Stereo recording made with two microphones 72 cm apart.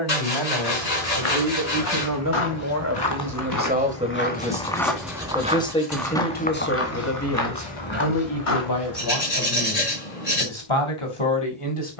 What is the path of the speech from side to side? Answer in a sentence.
You can hear the speech move to the left.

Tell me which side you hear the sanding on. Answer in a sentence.
In this clip you hear the sanding on the left.